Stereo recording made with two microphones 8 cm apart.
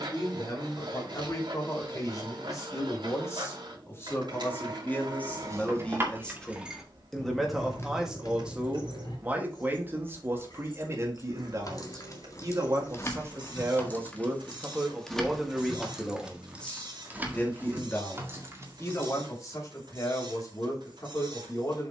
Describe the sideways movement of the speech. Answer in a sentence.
In this clip you hear the speech move from left to right and back again.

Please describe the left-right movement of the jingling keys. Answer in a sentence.
You can hear the jingling keys move from right to left and back again.